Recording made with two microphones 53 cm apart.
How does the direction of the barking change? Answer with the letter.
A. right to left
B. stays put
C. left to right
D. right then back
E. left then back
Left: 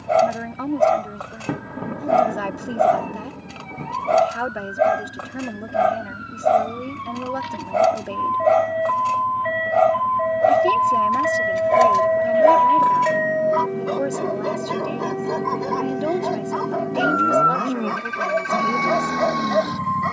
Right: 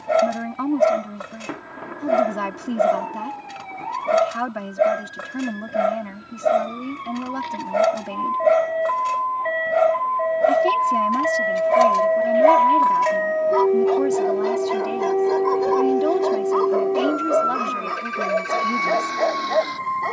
A.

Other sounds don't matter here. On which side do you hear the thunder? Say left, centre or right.
left.